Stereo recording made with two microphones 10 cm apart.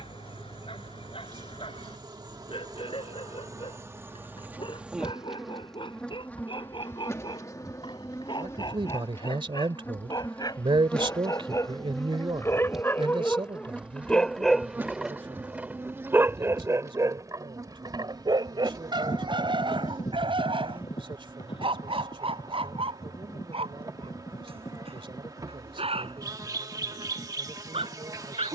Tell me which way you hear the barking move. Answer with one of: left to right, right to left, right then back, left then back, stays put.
left to right.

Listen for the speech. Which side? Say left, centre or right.
right.